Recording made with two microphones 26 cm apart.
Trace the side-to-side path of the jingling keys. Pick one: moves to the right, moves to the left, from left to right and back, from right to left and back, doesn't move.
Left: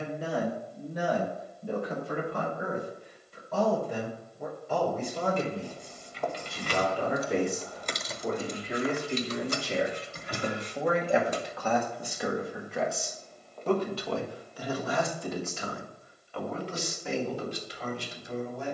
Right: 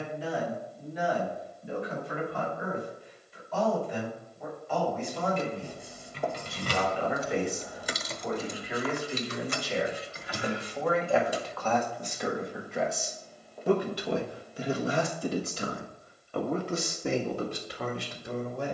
moves to the left.